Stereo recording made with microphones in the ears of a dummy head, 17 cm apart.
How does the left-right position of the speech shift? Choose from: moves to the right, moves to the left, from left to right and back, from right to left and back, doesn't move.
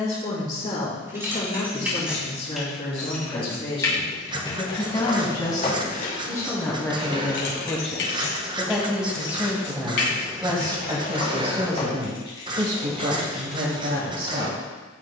moves to the right.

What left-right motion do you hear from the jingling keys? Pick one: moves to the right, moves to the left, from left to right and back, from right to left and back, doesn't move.
from right to left and back.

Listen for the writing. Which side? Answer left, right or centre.
right.